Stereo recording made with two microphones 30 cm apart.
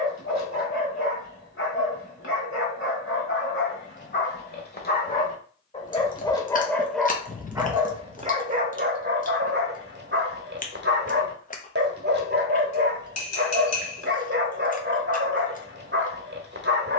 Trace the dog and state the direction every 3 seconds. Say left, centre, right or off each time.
left, left, centre, right, right, right.